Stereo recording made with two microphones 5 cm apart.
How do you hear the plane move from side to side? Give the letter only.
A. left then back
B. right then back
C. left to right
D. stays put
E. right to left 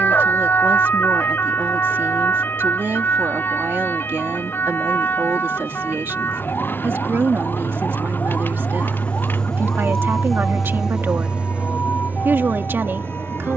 C.